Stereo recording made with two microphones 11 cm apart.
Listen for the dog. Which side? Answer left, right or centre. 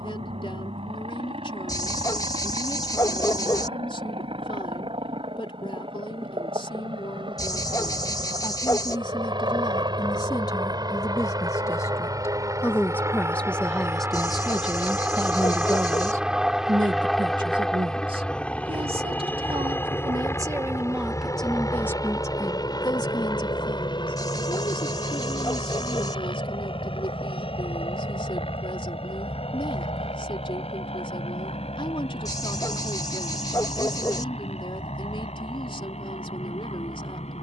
left.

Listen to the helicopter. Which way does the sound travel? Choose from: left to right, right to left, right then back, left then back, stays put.
right to left.